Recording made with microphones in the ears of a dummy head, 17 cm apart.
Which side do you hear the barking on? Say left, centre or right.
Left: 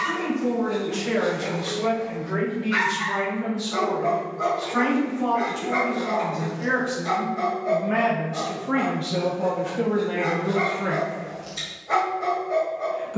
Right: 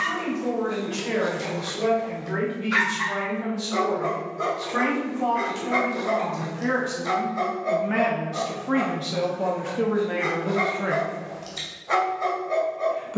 right.